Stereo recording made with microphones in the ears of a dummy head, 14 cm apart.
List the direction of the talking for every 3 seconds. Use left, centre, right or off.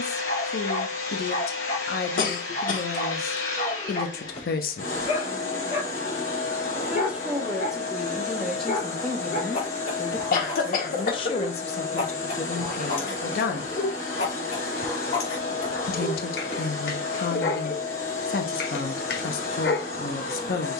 left, left, centre, left, left, left, left.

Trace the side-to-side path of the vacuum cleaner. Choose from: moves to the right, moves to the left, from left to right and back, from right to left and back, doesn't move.
doesn't move.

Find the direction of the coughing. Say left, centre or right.
left.